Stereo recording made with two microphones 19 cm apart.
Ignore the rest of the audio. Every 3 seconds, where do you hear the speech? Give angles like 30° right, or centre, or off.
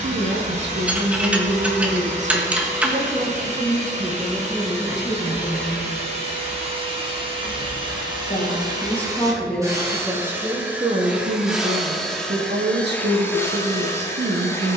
60° right, 10° right, 10° left, 20° right, 60° right.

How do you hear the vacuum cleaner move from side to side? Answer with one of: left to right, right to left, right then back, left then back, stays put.
right to left.